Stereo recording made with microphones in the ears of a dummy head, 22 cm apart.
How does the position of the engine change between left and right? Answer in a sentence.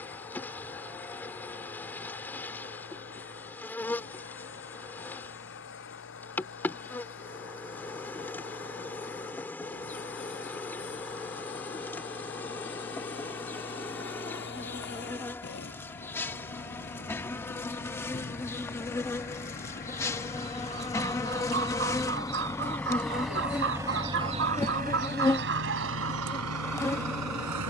In this clip you hear the engine move to the right.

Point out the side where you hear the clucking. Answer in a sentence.
In this clip you hear the clucking on the right.